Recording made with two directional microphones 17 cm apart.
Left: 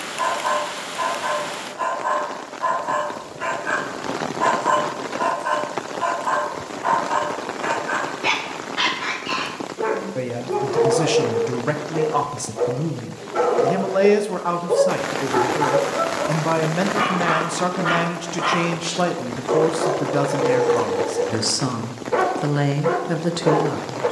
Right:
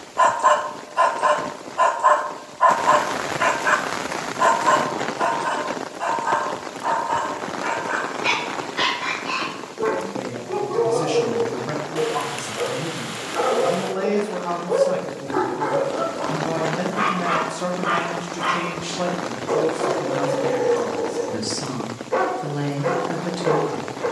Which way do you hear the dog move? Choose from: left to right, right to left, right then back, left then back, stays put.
right to left.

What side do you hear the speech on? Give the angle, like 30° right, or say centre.
50° left.